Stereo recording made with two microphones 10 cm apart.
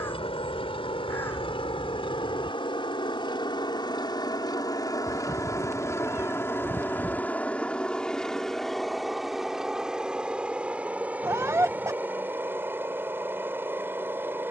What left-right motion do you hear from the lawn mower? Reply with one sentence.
In this clip you hear the lawn mower move to the right.